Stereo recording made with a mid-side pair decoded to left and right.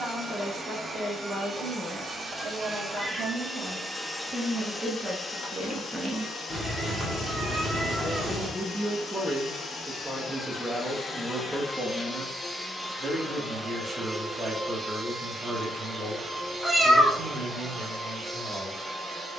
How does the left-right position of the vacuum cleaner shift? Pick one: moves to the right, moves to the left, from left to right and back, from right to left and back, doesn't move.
from right to left and back.